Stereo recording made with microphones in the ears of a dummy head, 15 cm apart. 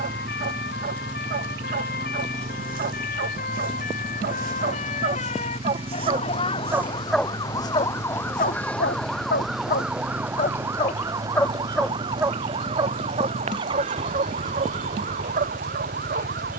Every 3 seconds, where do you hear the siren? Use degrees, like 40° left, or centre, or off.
60° left, 50° left, 20° left, 10° right, 40° right, 50° right.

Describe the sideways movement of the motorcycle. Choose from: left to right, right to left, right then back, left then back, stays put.
stays put.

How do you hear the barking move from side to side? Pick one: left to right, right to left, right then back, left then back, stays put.
left then back.